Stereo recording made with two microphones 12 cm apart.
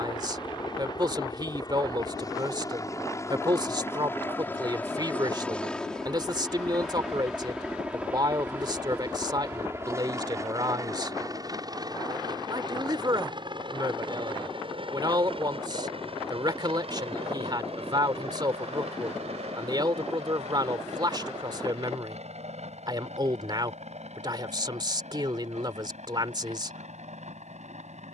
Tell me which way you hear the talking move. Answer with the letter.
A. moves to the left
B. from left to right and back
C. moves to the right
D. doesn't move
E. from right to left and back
D.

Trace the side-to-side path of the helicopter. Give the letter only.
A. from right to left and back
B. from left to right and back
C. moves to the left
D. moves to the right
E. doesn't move
D.